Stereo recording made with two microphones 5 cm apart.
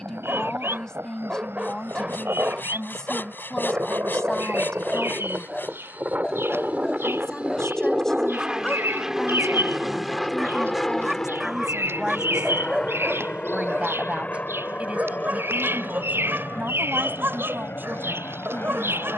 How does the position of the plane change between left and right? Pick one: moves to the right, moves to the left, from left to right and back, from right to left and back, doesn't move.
moves to the left.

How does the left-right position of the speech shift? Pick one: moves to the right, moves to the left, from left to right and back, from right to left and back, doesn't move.
moves to the right.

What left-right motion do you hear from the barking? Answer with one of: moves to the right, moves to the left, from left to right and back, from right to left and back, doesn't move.
from right to left and back.